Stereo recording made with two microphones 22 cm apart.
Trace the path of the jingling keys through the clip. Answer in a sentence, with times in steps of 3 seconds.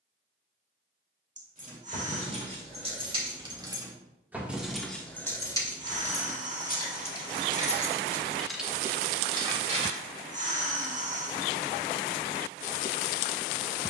You can hear the jingling keys on the right from 0 s, in the centre from 3 s, on the left from 6 s, on the right from 9 s and not at all from 12 s.